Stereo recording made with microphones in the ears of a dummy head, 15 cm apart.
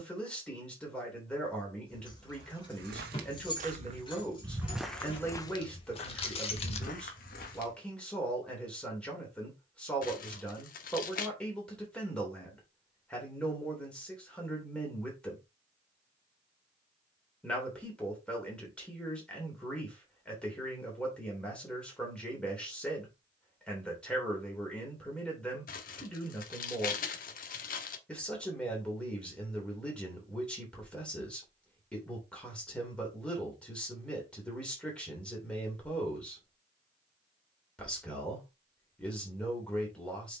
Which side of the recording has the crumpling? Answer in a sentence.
You can hear the crumpling on the left.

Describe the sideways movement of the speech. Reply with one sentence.
In this clip you hear the speech stay in one place.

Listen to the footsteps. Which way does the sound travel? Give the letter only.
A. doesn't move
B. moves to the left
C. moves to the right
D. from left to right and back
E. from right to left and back
B.